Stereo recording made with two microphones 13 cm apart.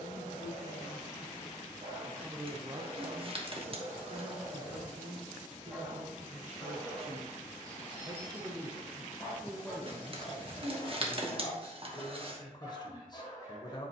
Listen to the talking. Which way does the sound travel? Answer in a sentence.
In this clip you hear the talking go right and come back.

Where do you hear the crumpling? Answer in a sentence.
In this clip you hear the crumpling on the right.